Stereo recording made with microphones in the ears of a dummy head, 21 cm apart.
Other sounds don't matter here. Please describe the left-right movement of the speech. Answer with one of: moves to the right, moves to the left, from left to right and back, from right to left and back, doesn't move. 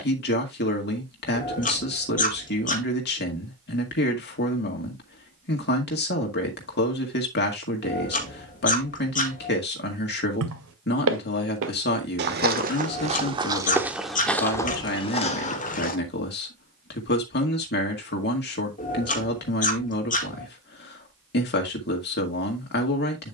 doesn't move.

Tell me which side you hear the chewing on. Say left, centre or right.
left.